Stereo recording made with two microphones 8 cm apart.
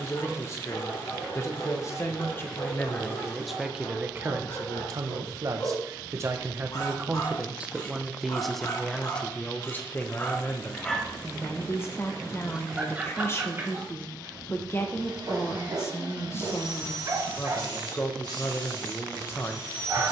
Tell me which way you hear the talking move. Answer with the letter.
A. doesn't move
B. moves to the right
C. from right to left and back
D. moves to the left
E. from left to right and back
E.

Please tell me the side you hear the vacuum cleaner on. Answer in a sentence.
In this clip you hear the vacuum cleaner on the right.